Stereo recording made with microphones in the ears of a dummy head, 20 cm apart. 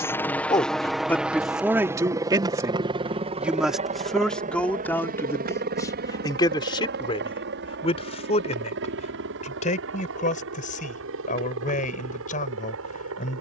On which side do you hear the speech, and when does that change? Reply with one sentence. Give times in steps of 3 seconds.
You can hear the speech in the centre from 0 s and on the left from 6 s.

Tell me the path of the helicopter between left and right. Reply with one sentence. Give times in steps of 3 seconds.
In this clip you hear the helicopter in the centre from 0 s and on the right from 3 s.